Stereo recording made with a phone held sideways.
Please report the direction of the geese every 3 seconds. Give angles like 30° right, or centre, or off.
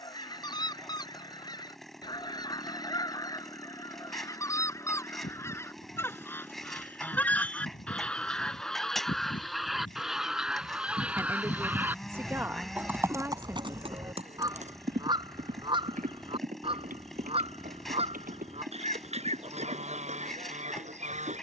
30° left, 20° left, 10° left, centre, 20° right, 40° right, 50° right.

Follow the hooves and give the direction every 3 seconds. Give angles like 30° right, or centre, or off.
off, 80° left, 70° left, 50° left, 30° right, 70° right, 80° right.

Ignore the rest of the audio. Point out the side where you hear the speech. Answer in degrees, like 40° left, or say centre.
20° right.